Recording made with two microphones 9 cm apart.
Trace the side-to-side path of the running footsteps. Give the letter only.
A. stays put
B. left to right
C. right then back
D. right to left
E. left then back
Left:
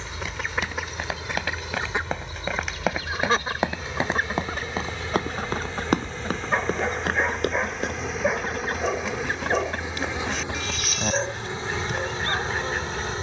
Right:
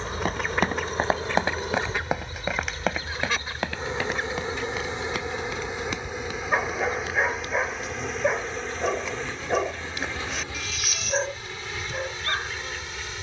D.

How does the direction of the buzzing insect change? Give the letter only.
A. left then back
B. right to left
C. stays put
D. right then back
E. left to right
B.